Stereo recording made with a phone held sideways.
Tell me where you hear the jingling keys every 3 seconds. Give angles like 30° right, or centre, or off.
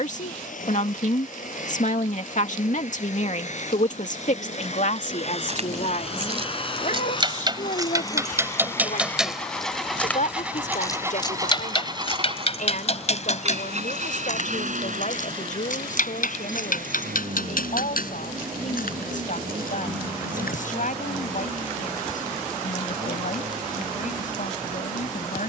off, 50° right, 30° right, 20° left, 50° left, 70° left, 70° left, off, off.